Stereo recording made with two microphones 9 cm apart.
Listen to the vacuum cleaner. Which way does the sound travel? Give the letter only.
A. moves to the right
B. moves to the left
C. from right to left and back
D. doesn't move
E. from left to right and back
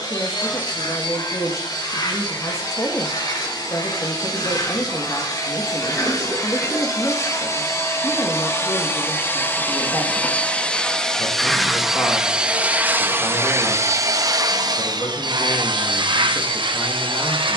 A.